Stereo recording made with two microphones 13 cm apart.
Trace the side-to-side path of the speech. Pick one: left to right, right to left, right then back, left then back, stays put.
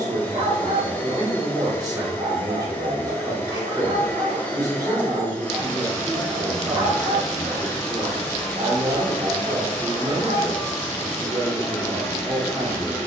stays put.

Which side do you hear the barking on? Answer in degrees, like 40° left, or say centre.
50° right.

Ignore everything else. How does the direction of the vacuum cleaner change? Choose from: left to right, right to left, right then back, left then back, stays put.
stays put.